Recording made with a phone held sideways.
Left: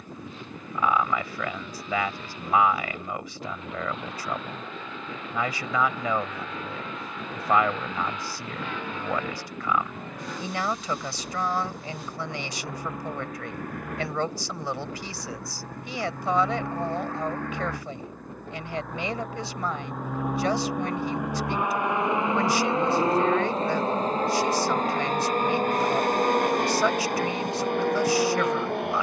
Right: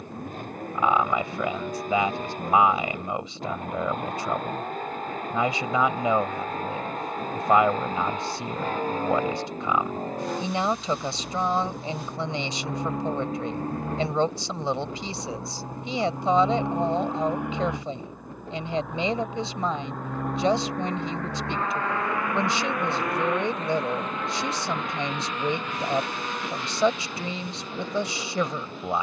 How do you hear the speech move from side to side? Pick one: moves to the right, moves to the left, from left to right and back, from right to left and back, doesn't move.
doesn't move.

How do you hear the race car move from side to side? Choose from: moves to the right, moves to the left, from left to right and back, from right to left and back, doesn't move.
moves to the left.